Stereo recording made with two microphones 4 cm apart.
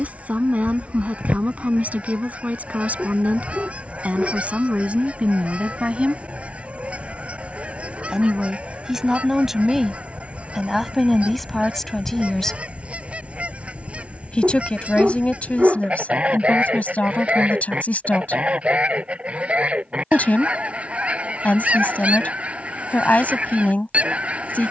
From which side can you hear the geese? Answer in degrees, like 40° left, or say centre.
30° right.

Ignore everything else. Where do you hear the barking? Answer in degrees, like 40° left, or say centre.
30° right.